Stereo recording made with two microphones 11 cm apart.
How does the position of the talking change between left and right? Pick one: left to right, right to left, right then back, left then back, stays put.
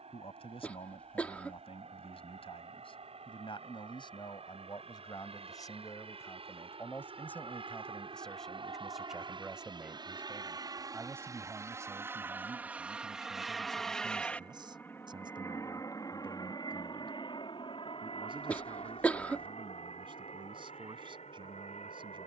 left to right.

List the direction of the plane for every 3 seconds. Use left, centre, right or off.
right, right, right, right, centre, left, left, left.